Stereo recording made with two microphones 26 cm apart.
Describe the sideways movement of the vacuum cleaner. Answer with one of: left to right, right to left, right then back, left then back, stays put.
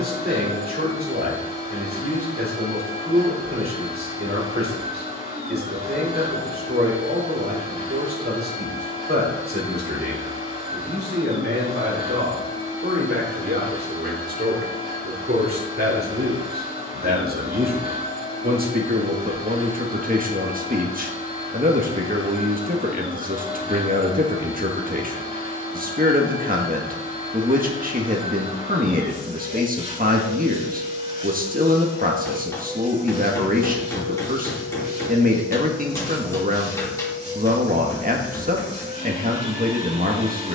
stays put.